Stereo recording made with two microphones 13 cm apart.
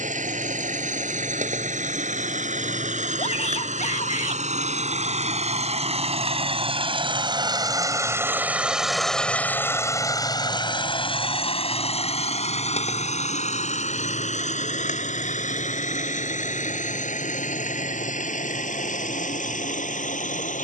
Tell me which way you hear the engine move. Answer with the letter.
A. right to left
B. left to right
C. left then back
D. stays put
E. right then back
A.